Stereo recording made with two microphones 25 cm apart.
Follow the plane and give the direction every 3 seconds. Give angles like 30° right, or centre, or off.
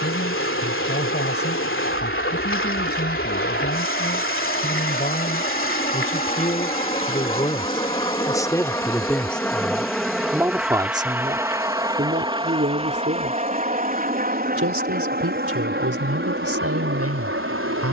50° left, 40° left, 20° left, centre, 30° right, 40° right.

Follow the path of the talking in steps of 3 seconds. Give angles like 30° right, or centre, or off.
40° left, 40° left, 20° left, 10° right, 40° right, 70° right.